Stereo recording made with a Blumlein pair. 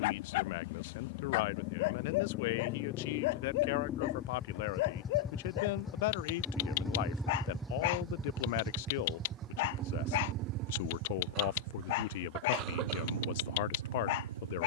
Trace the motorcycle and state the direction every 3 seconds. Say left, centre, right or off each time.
left, left, centre, right, right.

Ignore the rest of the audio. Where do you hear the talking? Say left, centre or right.
left.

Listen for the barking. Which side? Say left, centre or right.
left.